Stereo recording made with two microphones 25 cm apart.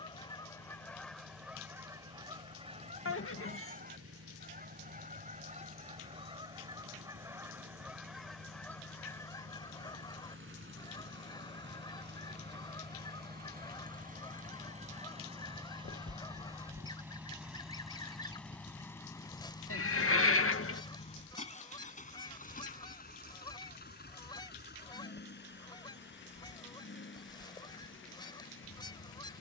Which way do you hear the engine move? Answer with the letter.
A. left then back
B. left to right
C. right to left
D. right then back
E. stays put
C.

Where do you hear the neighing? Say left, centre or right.
left.